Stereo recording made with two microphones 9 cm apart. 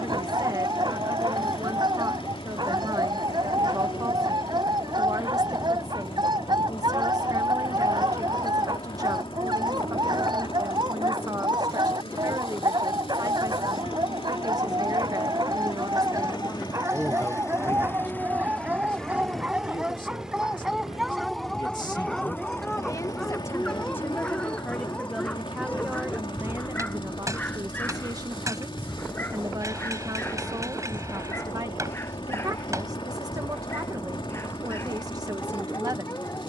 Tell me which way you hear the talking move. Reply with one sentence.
In this clip you hear the talking go left and come back.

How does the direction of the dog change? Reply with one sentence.
You can hear the dog travel towards the left.